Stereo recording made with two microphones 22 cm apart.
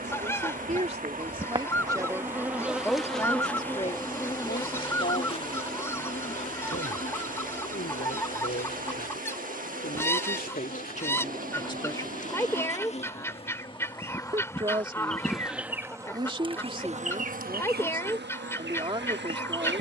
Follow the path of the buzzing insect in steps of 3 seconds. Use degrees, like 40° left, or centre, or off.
20° right, 20° left, 40° left, 40° left, 20° left, 20° right, 60° right.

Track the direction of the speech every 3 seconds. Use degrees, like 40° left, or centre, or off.
20° right, 30° left, 60° left, 40° left, 10° right, 20° right, 20° right.